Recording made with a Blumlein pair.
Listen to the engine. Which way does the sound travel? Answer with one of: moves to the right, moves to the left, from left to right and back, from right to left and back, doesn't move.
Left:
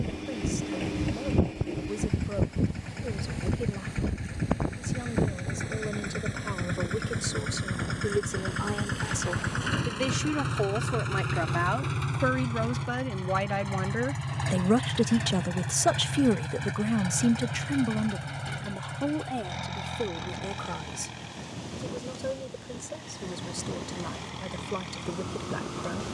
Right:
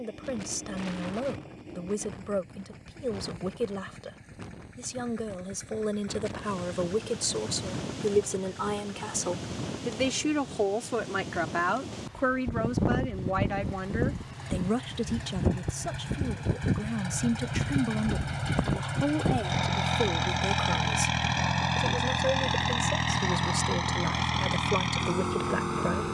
moves to the right.